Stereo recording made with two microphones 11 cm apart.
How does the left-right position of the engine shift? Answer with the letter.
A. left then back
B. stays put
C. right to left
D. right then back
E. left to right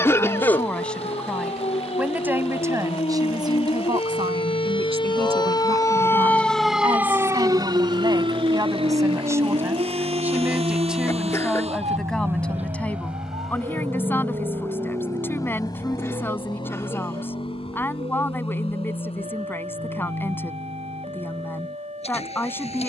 C.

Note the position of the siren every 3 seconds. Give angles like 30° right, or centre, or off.
80° left, 60° left, 30° right, 70° right, 80° right, 80° right, 80° right, 80° right.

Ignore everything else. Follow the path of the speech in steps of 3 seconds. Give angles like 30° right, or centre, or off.
centre, 50° right, 40° right, 10° right, 20° left, 20° left, 20° left, 20° left.